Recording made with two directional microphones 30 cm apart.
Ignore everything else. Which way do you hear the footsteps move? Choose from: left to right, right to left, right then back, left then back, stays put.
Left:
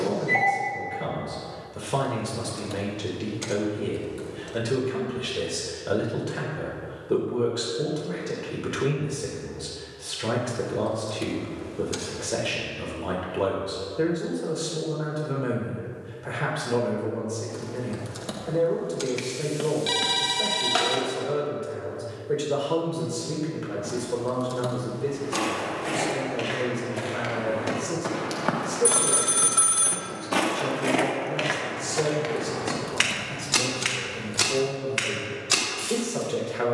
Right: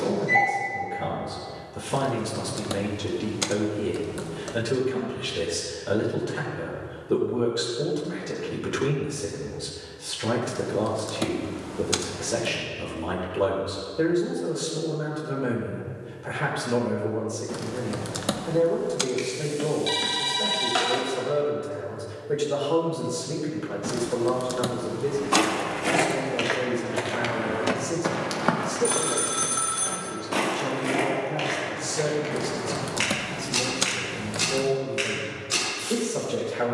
right to left.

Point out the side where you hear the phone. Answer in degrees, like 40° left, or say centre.
10° left.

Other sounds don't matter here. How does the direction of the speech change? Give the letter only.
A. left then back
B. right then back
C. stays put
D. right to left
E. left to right
C.